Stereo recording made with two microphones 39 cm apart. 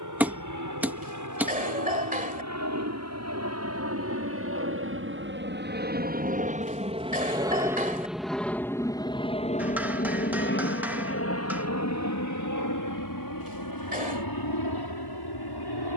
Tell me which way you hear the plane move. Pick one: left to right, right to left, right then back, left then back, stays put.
right to left.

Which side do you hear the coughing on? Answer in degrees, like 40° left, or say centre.
20° right.